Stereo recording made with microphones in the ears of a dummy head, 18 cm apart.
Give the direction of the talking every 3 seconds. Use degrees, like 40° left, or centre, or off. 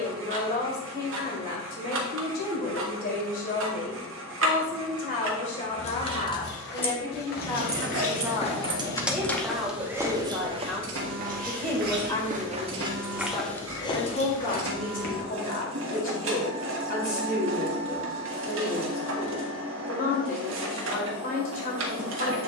50° left, 40° left, 20° left, centre, 30° left, 40° left, 40° left, 40° left.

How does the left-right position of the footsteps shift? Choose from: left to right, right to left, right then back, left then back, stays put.
right then back.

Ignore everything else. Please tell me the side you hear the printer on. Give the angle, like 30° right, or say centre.
70° right.